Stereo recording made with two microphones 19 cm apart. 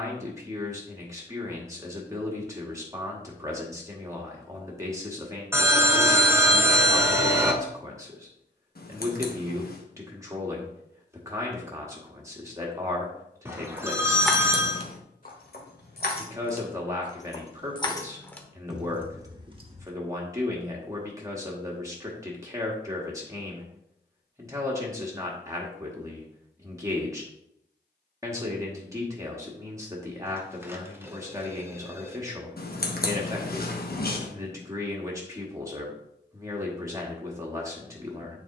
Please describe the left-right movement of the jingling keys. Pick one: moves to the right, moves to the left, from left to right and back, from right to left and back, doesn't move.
from right to left and back.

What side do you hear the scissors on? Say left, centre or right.
left.